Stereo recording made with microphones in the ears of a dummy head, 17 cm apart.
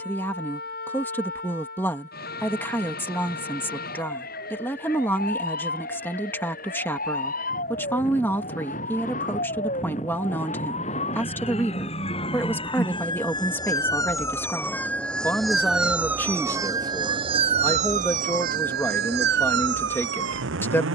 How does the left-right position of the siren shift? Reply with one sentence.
In this clip you hear the siren travel towards the right.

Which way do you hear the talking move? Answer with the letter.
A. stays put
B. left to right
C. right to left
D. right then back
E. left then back
A.